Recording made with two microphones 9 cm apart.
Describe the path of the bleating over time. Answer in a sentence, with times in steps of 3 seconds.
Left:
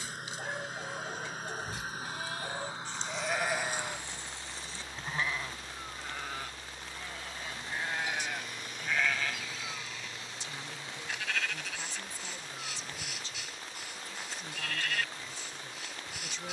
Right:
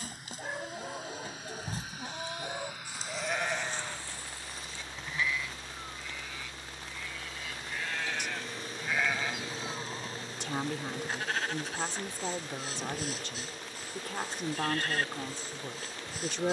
In this clip you hear the bleating on the right from 0 s, on the left from 3 s and on the right from 9 s.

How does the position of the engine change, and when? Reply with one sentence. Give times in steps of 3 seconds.
In this clip you hear the engine on the left from 0 s, in the centre from 3 s and on the right from 6 s.